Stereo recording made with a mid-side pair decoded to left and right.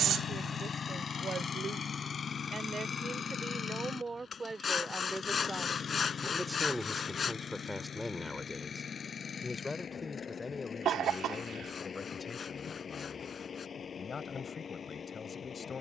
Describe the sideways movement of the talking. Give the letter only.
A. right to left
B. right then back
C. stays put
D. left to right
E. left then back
A.